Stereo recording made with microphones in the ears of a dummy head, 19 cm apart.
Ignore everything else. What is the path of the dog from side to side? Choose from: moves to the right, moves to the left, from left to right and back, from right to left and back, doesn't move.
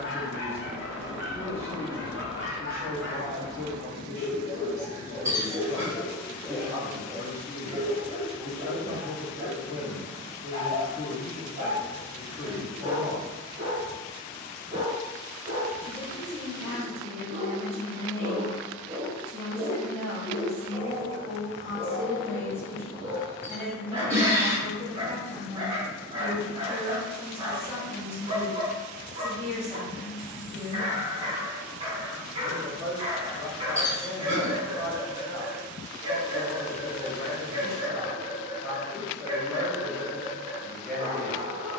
moves to the right.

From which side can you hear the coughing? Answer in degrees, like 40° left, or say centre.
10° right.